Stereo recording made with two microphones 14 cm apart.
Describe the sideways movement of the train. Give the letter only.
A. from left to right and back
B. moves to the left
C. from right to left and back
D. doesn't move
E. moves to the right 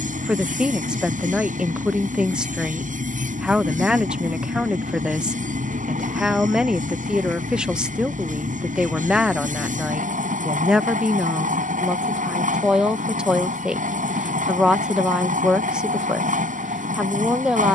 D.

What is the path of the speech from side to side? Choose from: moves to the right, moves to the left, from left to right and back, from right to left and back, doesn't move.
doesn't move.